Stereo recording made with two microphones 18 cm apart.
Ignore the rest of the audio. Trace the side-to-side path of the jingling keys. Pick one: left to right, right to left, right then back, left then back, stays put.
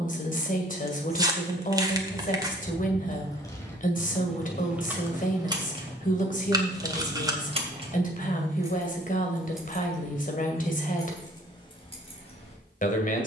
right then back.